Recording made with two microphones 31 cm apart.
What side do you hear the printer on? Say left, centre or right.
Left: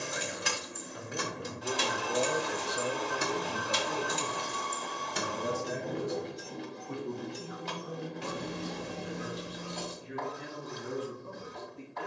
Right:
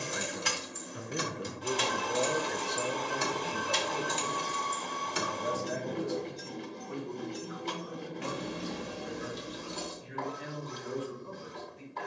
right.